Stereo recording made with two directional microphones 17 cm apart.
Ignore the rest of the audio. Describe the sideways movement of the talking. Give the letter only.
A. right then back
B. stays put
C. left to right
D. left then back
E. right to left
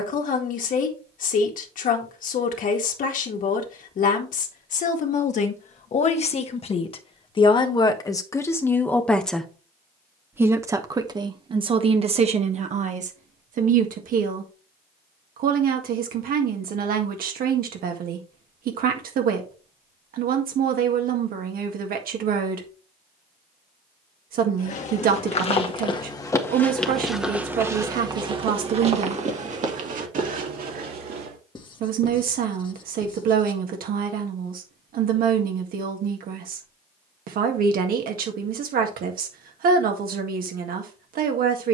C.